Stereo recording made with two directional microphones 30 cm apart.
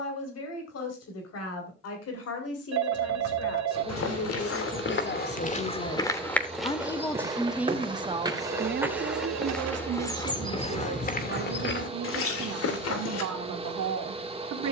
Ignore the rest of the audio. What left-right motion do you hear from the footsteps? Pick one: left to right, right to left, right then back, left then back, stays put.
right then back.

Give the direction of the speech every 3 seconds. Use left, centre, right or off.
left, left, centre, right, right.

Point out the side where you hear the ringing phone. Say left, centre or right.
right.